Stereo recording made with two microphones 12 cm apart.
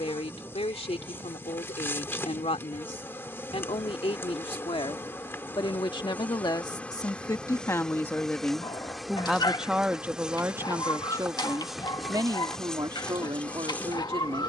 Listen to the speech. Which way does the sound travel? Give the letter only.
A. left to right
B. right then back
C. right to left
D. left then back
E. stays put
A.